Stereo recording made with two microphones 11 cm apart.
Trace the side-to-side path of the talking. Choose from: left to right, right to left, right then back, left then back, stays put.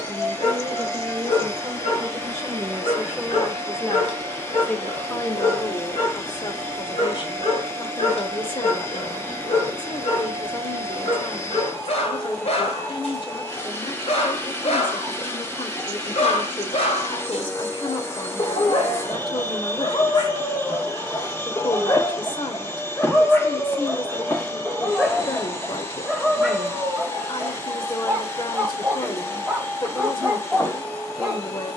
right to left.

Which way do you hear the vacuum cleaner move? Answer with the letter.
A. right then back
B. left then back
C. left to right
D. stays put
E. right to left
D.